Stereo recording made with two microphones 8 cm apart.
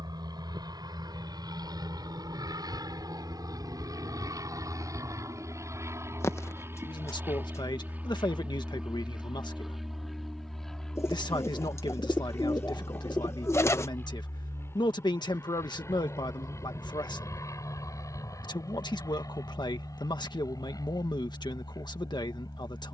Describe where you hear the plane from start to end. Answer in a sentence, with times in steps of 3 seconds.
In this clip you hear the plane on the right from 0 s, in the centre from 9 s and on the left from 12 s.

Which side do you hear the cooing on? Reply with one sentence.
In this clip you hear the cooing on the left.